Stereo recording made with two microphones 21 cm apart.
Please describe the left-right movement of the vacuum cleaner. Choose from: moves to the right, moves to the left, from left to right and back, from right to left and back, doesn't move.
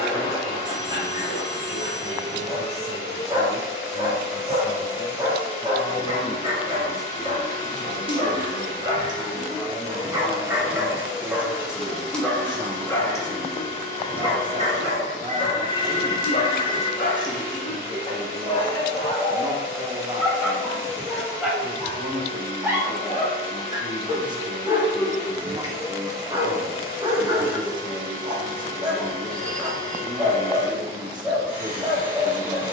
doesn't move.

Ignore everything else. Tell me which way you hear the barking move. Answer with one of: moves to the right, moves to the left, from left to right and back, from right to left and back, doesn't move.
from right to left and back.